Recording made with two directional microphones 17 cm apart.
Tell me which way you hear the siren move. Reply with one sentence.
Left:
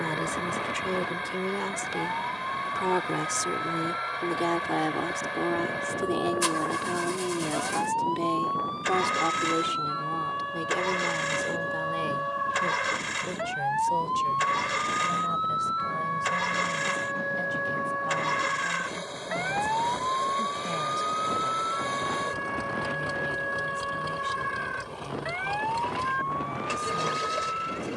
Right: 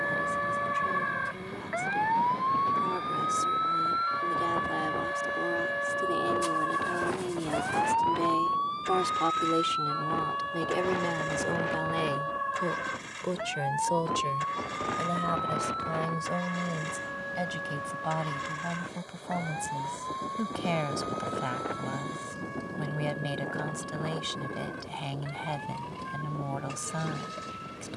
In this clip you hear the siren go from the right side to the left.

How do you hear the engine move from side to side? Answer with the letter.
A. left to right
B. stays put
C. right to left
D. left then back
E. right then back
B.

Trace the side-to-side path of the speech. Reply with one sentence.
You can hear the speech move from left to right.